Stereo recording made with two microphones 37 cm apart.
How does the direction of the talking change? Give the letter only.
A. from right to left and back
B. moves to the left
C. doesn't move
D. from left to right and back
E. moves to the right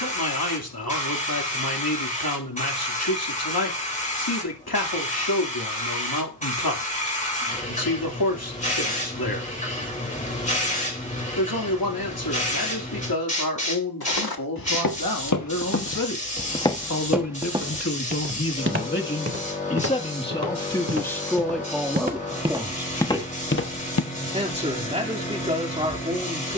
E.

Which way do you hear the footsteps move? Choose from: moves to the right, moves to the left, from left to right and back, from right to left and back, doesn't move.
from left to right and back.